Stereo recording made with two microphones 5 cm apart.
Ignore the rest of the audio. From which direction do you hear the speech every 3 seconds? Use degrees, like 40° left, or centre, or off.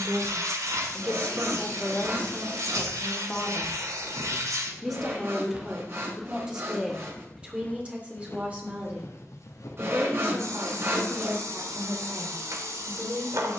20° left, centre, 20° right, 30° right, 40° right.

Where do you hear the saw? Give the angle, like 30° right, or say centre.
50° right.